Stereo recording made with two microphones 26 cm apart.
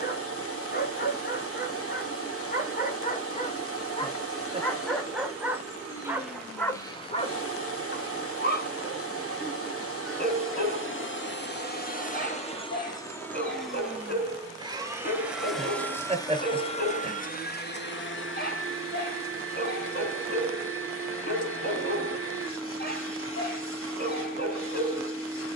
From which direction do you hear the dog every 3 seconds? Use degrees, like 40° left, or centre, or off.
40° left, 10° left, 20° left, 40° left, 40° left, 40° left, 40° left, 40° left, 40° left.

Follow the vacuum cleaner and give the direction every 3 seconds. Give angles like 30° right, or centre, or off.
60° left, 60° left, 60° left, 50° left, 10° left, 20° left, 50° left, 50° left, 50° left.